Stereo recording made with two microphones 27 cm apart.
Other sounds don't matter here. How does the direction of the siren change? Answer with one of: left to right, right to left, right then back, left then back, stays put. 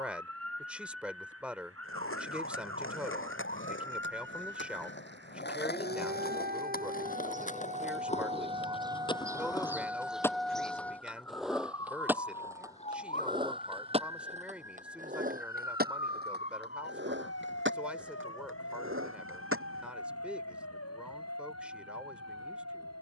right to left.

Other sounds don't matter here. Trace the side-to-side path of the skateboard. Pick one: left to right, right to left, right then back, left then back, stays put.
left to right.